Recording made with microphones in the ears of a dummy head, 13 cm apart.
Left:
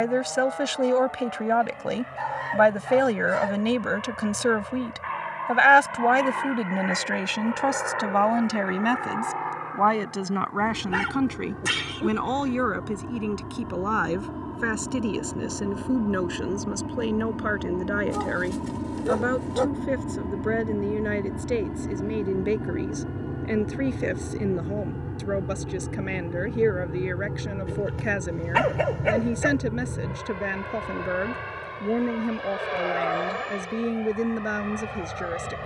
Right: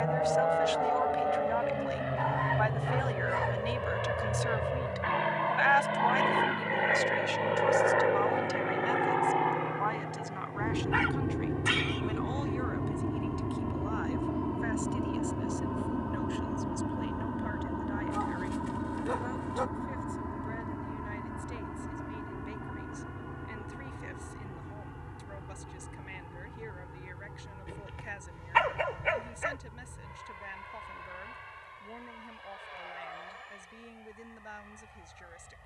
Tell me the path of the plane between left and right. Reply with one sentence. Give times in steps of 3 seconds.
In this clip you hear the plane on the right from 0 s, in the centre from 12 s and on the left from 18 s.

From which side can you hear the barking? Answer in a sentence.
You can hear the barking on the left.